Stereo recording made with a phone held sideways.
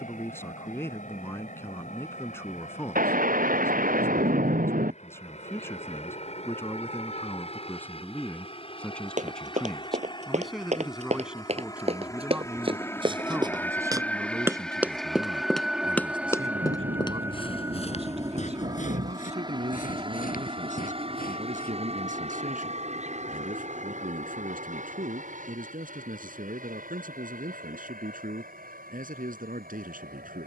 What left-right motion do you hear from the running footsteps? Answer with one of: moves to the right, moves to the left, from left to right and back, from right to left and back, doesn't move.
moves to the left.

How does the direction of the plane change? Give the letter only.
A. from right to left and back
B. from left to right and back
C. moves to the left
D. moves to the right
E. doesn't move
D.